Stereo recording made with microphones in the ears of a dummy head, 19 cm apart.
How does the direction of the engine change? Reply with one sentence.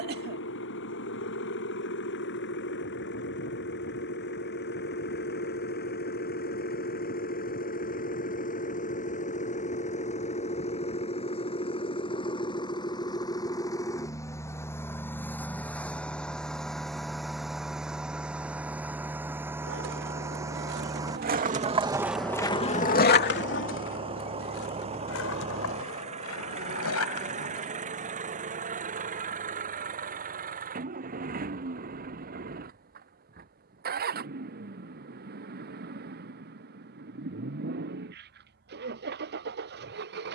You can hear the engine go from the left side to the right.